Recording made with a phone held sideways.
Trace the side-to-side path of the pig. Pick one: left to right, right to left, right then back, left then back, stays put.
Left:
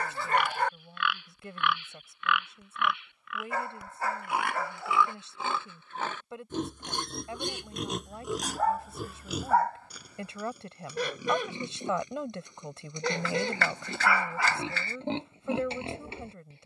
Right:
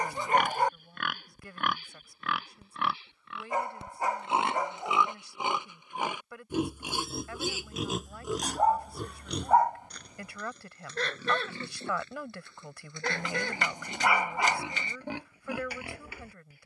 right to left.